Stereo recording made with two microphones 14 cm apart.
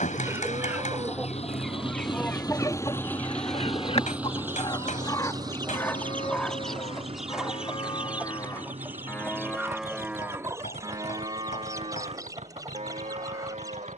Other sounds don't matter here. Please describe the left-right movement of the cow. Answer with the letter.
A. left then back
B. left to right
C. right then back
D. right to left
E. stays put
A.